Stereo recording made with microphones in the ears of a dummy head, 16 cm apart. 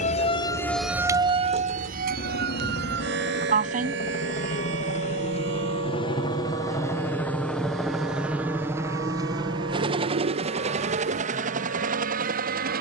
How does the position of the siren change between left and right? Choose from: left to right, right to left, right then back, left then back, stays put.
left to right.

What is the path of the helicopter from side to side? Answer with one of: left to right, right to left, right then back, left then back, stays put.
left to right.